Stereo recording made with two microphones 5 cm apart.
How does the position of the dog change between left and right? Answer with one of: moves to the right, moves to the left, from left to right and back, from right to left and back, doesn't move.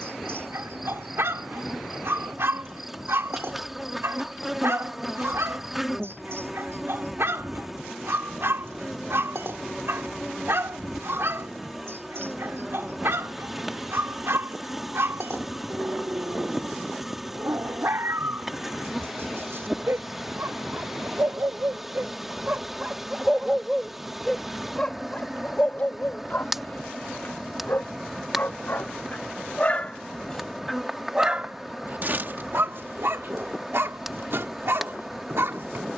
from right to left and back.